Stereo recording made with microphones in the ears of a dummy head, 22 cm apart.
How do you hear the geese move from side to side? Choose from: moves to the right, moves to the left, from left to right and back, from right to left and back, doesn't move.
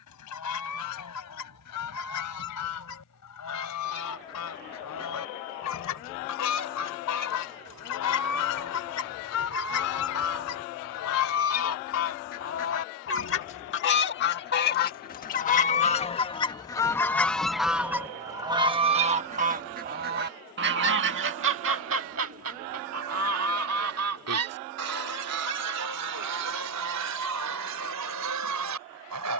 moves to the right.